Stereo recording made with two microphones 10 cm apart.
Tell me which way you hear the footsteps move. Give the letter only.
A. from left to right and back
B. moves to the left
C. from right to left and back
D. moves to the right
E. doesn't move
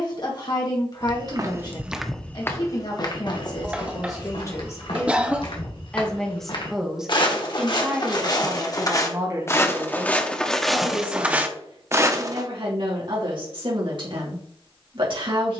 C.